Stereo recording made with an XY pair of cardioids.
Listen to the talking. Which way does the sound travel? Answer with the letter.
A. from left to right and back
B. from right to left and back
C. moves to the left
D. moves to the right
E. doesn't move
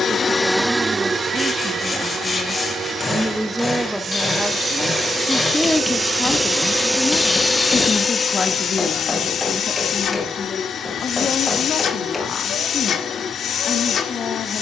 C.